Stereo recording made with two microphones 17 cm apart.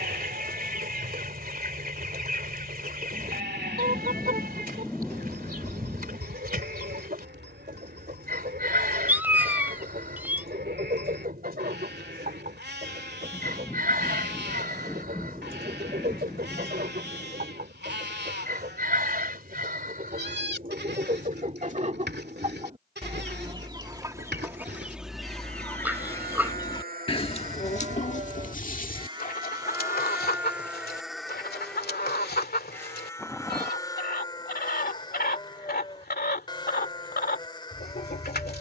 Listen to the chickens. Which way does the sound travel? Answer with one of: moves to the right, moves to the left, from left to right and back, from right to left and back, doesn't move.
moves to the left.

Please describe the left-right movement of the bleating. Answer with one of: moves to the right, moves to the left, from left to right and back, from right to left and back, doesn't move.
moves to the left.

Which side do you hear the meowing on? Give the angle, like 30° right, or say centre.
10° right.